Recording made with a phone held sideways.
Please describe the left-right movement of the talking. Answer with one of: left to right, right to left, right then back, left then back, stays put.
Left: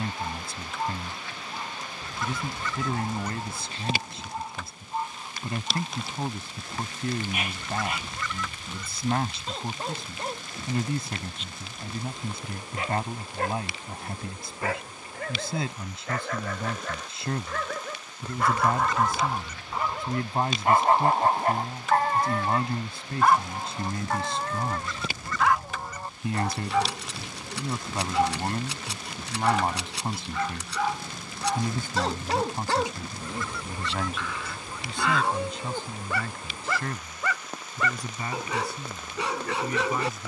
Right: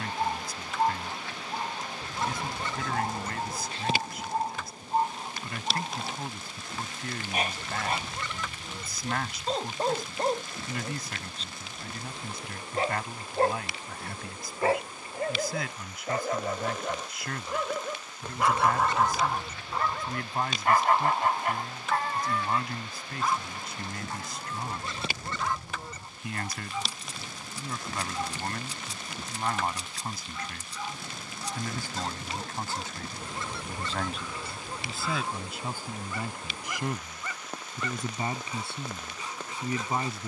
left to right.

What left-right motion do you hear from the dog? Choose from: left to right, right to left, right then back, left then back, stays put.
right to left.